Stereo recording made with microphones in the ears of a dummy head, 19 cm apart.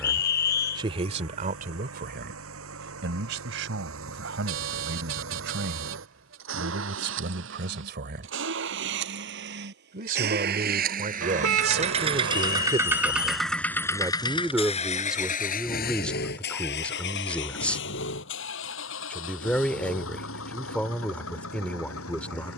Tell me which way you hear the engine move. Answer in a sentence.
In this clip you hear the engine go from the right side to the left.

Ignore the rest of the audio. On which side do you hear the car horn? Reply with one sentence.
You can hear the car horn on the right.